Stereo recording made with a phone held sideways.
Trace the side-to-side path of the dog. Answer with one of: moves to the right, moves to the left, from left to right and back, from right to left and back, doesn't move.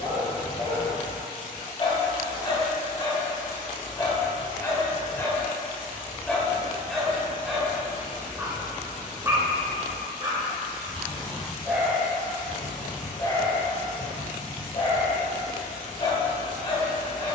from left to right and back.